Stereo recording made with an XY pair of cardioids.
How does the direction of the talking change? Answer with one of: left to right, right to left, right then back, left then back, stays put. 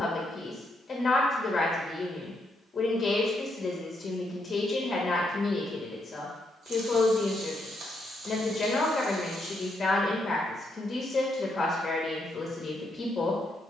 stays put.